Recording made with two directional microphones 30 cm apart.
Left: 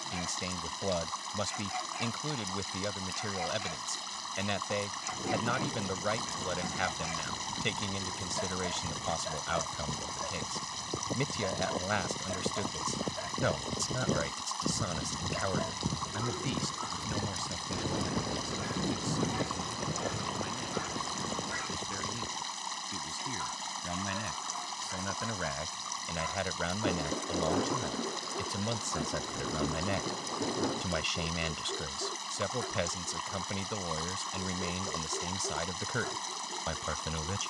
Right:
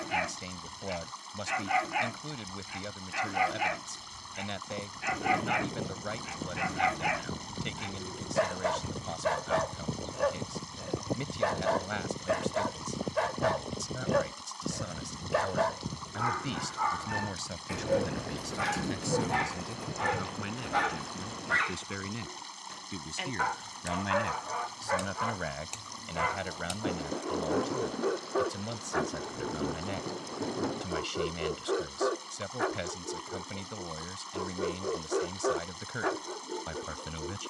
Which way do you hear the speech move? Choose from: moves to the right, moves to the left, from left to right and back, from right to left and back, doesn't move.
from left to right and back.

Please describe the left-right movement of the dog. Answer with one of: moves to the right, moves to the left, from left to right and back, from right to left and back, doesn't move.
doesn't move.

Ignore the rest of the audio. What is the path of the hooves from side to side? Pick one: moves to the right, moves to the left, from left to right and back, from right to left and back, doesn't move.
moves to the left.